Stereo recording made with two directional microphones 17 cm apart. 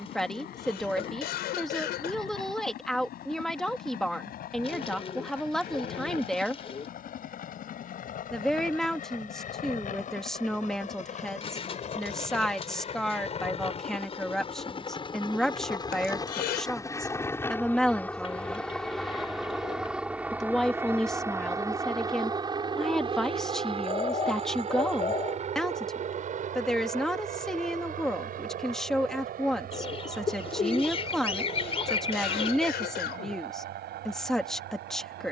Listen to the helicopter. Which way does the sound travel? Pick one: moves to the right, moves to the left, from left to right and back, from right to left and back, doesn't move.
moves to the right.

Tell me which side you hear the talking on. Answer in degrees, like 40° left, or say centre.
centre.